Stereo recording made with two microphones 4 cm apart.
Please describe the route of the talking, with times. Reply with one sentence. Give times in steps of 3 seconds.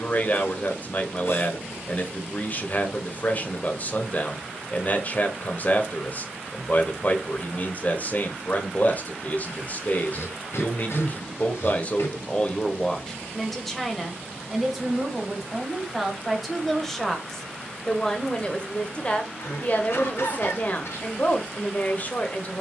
You can hear the talking on the left from 0 s, in the centre from 12 s and on the left from 18 s.